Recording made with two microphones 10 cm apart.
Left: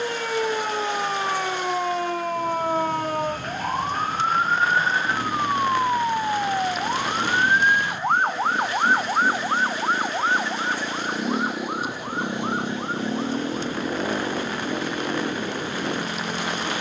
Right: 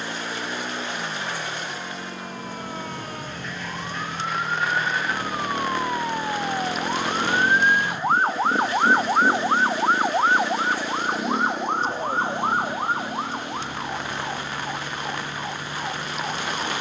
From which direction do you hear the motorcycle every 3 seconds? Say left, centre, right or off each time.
right, right, right, centre, left, left.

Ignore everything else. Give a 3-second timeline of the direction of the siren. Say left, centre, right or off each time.
left, left, centre, right, right, right.